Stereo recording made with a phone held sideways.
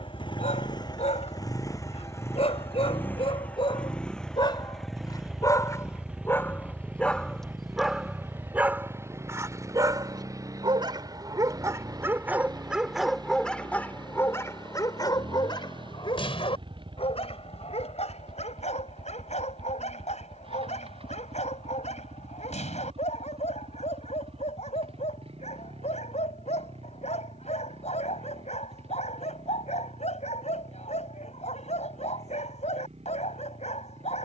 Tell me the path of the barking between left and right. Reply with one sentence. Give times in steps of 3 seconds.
You can hear the barking on the left from 0 s, in the centre from 6 s, on the right from 9 s, in the centre from 12 s and on the left from 15 s.